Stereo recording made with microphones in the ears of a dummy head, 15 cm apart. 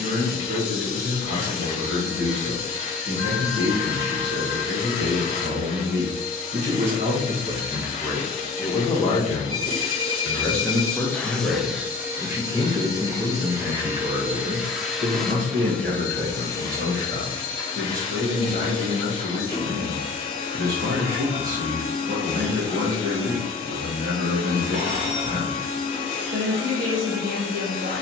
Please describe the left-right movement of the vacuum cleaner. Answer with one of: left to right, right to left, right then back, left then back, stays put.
right then back.